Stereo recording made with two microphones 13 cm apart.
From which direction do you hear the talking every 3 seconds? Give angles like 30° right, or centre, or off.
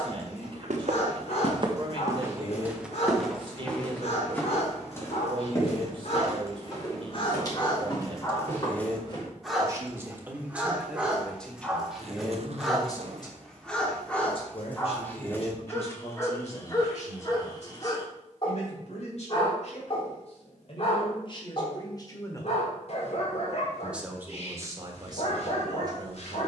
40° right, 40° right, 40° right, 10° right, 40° left, 60° left, 60° left, 30° left, 30° right.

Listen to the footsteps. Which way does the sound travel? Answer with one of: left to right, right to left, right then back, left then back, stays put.
right to left.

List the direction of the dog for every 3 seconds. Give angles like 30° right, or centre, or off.
60° left, 60° left, 40° left, 10° right, 10° left, 30° left, 40° left, 50° left, 50° left.